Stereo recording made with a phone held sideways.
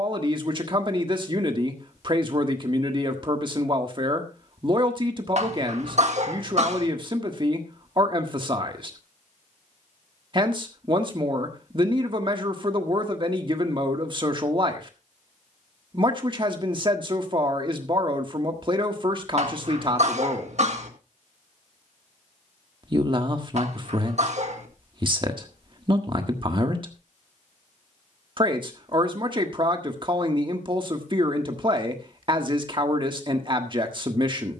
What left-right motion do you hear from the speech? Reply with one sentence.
You can hear the speech stay in one place.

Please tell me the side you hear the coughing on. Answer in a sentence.
In this clip you hear the coughing on the right.